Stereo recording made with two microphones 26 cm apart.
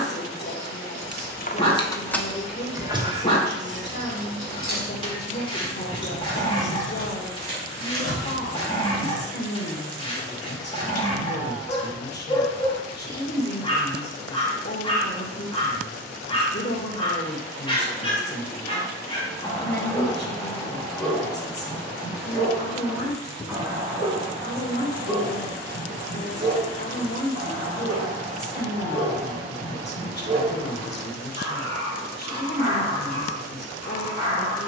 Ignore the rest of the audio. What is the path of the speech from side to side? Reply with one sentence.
You can hear the speech stay in one place.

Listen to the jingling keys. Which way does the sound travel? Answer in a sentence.
In this clip you hear the jingling keys go from the left side to the right.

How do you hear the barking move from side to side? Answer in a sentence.
In this clip you hear the barking go from the left side to the right.